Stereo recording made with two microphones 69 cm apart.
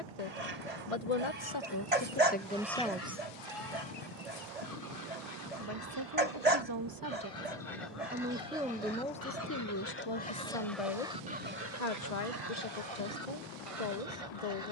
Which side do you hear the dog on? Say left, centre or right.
right.